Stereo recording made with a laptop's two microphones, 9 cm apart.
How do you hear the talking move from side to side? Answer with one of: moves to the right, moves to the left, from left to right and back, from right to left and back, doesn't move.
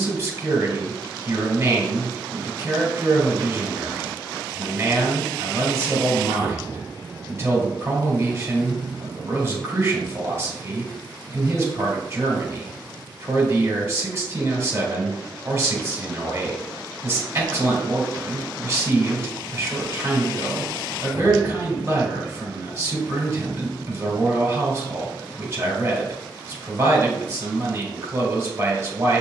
doesn't move.